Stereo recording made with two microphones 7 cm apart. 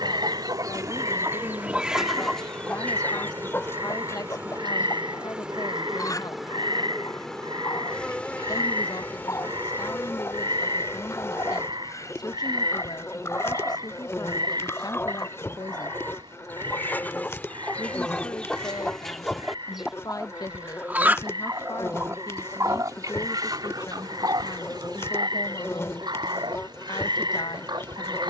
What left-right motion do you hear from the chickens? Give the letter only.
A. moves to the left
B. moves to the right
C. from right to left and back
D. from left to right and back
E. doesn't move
C.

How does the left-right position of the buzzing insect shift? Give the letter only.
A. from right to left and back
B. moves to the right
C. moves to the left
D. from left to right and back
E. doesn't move
C.